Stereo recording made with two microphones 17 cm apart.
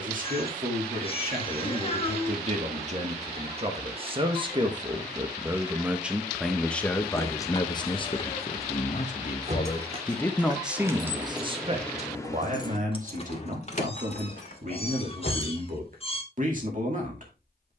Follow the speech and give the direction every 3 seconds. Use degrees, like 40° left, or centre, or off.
50° right, 30° right, 20° left, centre, 50° right, 50° right.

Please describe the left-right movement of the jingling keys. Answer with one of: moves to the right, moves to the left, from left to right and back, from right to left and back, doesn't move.
moves to the left.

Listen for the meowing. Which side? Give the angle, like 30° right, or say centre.
30° left.